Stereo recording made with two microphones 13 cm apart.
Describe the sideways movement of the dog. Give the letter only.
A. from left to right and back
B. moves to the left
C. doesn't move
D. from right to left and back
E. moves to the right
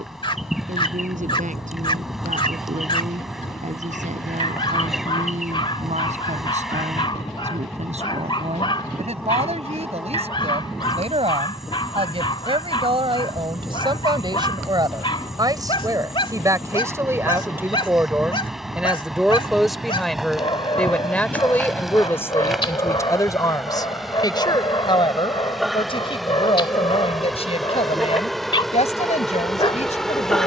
C.